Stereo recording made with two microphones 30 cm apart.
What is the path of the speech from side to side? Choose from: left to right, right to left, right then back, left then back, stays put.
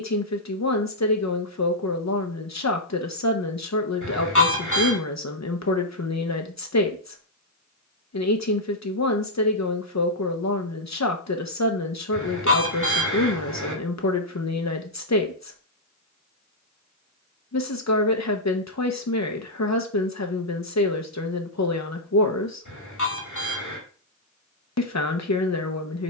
stays put.